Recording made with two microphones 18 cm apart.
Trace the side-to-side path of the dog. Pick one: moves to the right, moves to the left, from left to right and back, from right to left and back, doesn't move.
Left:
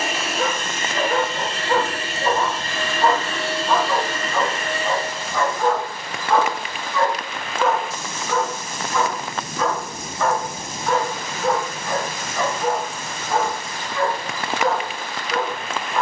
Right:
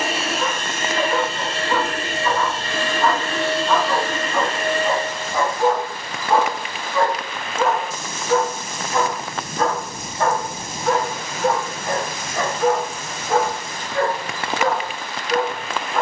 moves to the right.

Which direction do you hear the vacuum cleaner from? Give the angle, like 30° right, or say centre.
30° right.